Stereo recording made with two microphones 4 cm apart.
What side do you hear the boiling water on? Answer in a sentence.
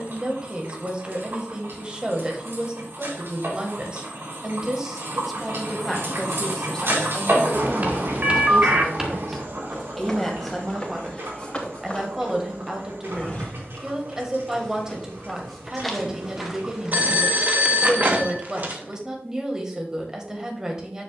In this clip you hear the boiling water on the right.